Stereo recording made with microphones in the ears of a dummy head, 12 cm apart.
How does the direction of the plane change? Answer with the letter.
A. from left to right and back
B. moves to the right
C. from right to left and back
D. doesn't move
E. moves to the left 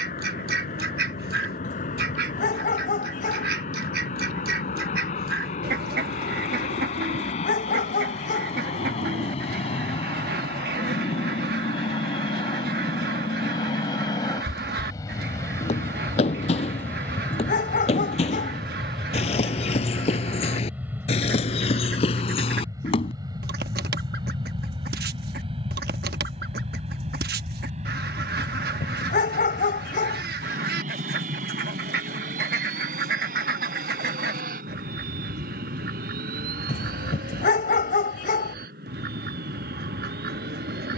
B.